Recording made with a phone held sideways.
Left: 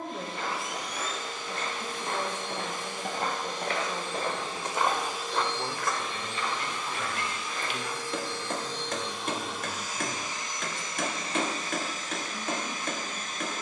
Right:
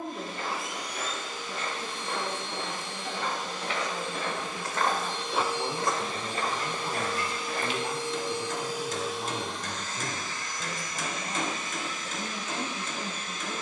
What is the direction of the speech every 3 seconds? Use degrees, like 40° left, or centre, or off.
40° left, 20° left, 20° right, 50° right, 60° right.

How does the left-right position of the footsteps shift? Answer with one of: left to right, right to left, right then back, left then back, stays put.
left to right.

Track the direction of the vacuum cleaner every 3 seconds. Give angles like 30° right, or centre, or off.
50° left, 30° left, 30° right, 20° left, 40° left.